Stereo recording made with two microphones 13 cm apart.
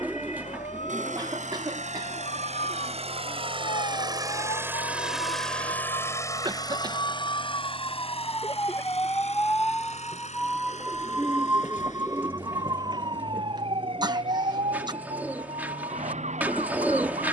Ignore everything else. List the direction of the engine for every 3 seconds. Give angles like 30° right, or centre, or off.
70° right, 20° right, 40° left, 60° left, 70° left, 70° left.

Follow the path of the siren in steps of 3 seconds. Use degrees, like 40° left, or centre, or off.
60° left, 50° left, 30° left, centre, 40° right, 60° right.